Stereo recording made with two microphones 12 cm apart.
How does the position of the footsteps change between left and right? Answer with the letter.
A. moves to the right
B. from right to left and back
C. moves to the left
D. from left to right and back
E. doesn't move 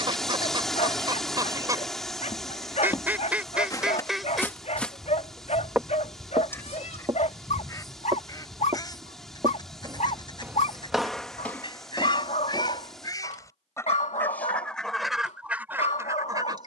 D.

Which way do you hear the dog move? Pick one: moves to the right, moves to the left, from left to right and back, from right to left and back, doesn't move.
doesn't move.